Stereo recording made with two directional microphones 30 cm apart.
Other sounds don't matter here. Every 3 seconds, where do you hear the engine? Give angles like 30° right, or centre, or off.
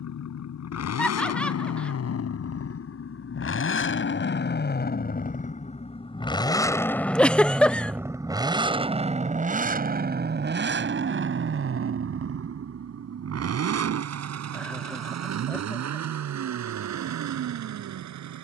50° left, 30° left, centre, 40° right, 50° right, 60° right.